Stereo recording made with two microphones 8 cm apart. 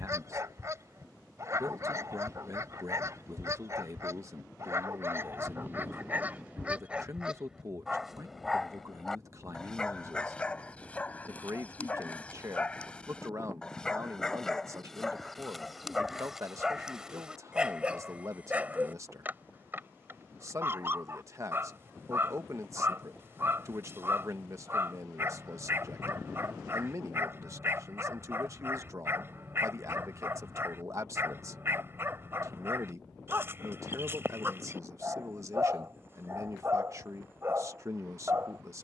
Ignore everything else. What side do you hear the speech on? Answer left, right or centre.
right.